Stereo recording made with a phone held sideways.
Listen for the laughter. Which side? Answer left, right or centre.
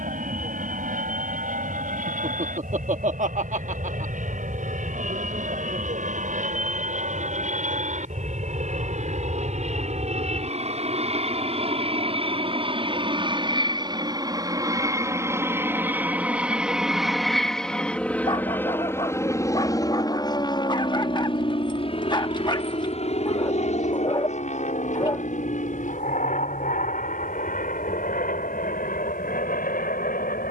right.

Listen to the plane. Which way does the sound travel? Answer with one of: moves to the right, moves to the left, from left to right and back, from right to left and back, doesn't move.
moves to the left.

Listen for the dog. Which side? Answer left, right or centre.
left.